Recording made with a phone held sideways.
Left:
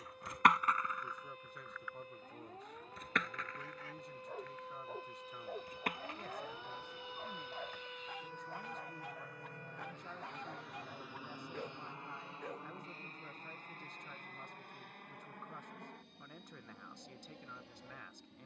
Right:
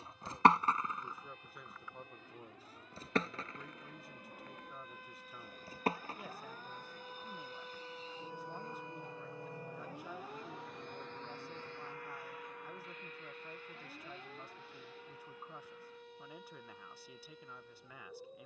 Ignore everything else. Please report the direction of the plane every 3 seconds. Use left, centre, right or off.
right, right, right, centre, left, left.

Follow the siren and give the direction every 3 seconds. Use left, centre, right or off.
left, left, centre, right, right, right.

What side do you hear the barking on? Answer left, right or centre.
left.